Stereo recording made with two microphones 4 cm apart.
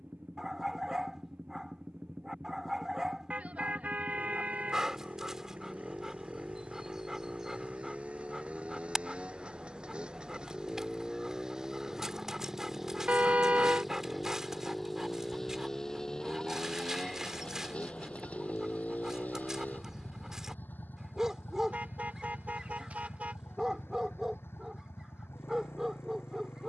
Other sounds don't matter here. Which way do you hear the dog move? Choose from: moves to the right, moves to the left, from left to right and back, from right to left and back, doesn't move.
doesn't move.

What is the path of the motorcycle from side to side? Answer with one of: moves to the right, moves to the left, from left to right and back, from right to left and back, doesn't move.
moves to the left.